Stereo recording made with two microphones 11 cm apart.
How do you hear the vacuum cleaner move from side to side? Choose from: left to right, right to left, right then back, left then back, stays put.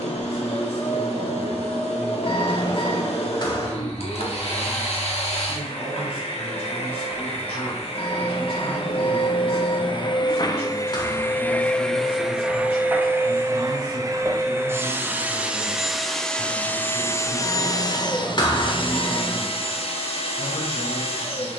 right then back.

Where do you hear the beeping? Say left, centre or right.
left.